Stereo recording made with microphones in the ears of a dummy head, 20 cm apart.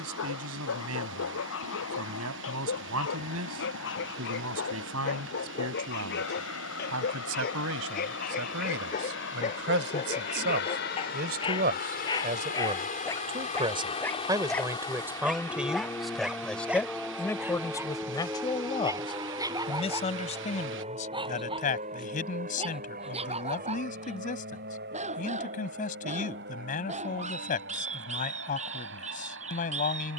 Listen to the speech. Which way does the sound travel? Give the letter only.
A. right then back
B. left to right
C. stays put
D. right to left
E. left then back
D.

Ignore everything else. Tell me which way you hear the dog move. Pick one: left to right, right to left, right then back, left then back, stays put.
left to right.